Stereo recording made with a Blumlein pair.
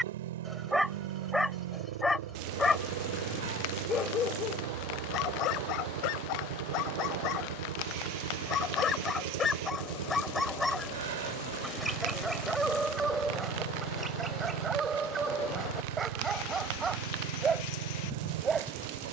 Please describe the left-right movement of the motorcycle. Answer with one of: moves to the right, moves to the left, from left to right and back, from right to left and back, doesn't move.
doesn't move.